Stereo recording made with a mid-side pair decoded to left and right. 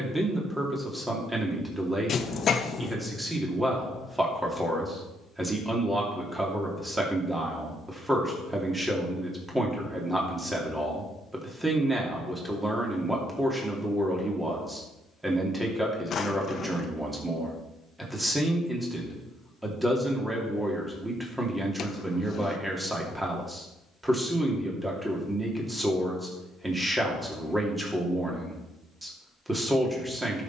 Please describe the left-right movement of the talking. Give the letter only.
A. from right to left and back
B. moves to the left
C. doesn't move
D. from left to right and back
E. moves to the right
C.